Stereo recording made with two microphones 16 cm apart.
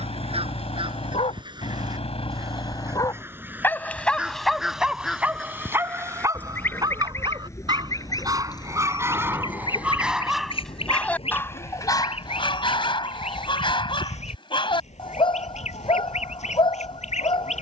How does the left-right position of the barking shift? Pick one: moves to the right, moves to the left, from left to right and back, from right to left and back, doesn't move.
from left to right and back.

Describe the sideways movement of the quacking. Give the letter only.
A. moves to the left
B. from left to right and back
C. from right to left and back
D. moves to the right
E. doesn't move
A.